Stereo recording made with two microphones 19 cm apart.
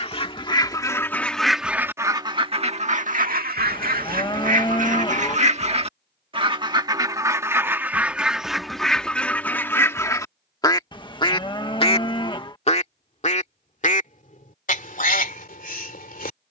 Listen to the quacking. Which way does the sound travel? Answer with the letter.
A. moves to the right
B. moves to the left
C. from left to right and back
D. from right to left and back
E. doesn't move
C.